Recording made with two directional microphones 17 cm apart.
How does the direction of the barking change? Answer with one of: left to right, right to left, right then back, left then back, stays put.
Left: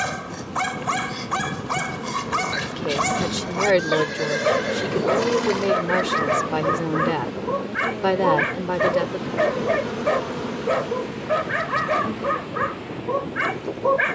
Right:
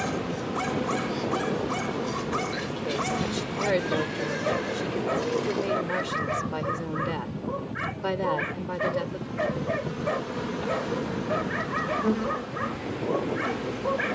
stays put.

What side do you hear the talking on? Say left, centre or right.
left.